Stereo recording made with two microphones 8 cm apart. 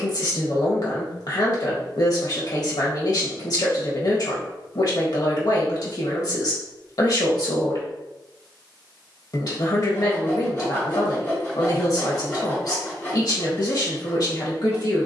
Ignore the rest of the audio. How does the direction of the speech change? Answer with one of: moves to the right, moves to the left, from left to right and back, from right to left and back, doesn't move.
doesn't move.